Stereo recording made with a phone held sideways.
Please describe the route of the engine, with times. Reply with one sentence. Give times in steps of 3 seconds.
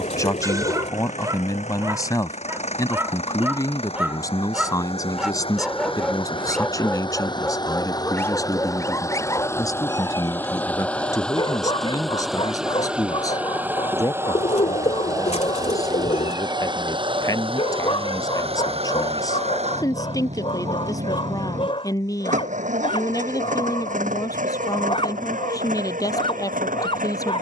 You can hear the engine on the left from 0 s, in the centre from 9 s and on the right from 15 s.